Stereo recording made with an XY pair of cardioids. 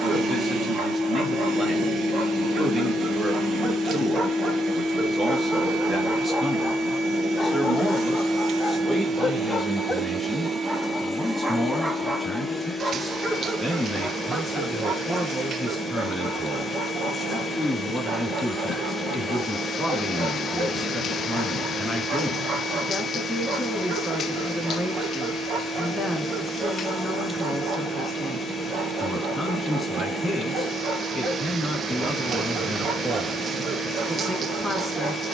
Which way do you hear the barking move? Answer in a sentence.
You can hear the barking move from right to left and back again.